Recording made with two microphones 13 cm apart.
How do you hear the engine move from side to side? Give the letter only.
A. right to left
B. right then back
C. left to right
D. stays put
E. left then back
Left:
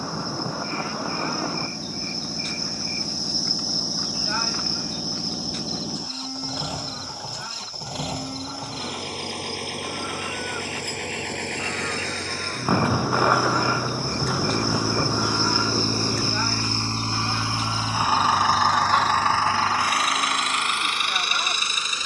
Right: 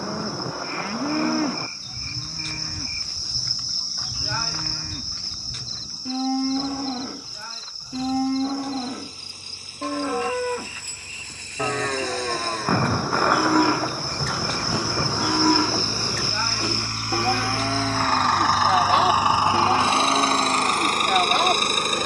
C.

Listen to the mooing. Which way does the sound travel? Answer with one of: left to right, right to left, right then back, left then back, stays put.
stays put.